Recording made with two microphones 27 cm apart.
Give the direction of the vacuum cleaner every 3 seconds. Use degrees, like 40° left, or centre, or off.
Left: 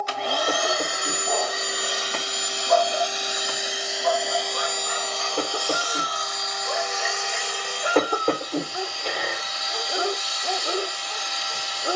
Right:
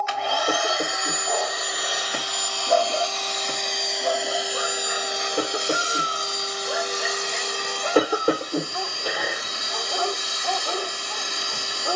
30° left, 10° right, 40° right, 50° right.